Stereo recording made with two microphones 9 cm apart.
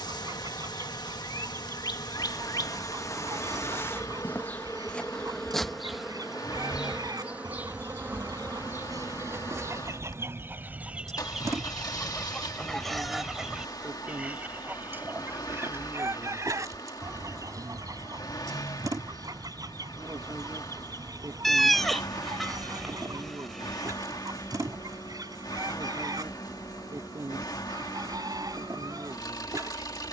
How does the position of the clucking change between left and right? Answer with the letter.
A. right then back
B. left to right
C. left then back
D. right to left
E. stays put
C.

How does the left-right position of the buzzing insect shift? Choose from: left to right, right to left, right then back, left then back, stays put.
left to right.